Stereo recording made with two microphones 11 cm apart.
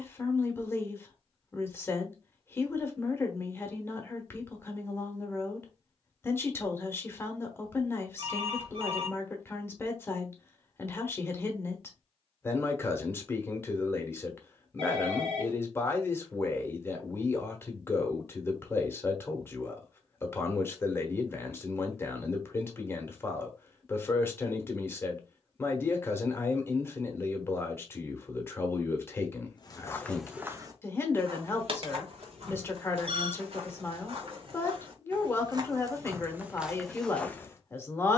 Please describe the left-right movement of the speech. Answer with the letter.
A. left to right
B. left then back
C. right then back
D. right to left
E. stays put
E.